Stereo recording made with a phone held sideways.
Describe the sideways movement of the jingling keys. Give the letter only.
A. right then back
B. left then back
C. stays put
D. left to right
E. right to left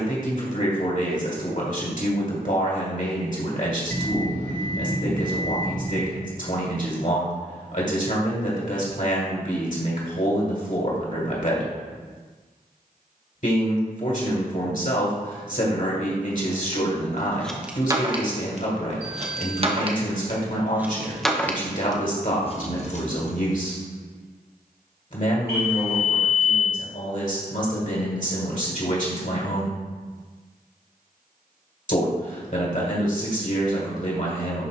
A.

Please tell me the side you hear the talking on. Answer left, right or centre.
left.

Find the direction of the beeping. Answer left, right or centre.
right.